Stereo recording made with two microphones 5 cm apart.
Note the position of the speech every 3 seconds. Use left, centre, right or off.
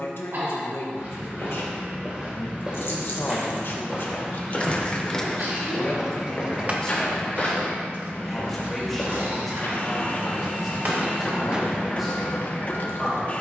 left, left, centre, centre, centre.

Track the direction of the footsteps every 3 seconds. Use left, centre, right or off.
right, centre, left, left, left.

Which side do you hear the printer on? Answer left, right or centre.
left.